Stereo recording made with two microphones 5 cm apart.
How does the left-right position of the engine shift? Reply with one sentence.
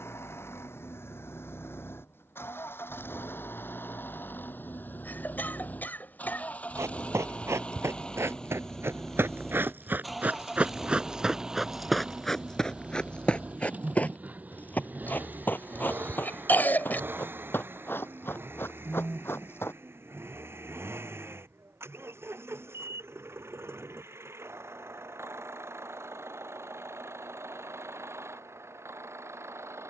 You can hear the engine go from the left side to the right.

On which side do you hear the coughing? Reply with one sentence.
You can hear the coughing on the left.